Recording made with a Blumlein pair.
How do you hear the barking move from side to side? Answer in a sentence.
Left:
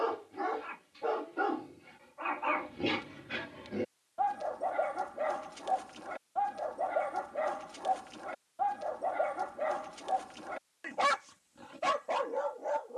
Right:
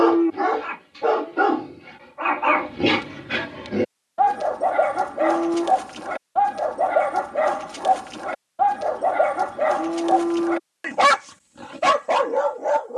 In this clip you hear the barking stay in one place.